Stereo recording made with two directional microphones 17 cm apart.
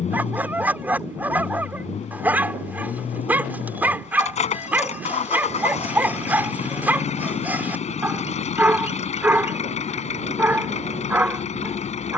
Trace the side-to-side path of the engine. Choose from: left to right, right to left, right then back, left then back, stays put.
stays put.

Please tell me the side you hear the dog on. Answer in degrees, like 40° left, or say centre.
10° right.